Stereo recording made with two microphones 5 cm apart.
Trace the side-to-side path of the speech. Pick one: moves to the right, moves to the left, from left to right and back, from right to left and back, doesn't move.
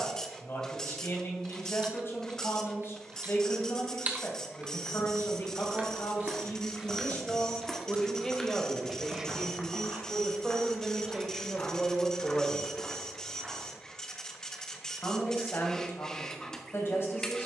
from left to right and back.